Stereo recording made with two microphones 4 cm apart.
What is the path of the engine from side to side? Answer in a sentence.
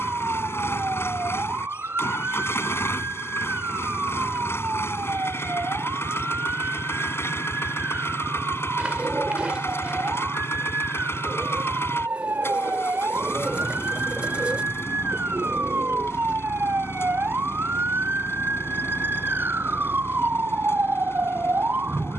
You can hear the engine stay put.